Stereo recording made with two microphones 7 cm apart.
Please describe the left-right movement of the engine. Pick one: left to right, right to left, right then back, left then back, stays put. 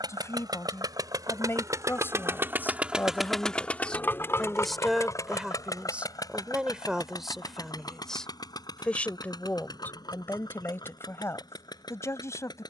right to left.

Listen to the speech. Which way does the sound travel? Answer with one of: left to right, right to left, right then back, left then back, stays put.
right then back.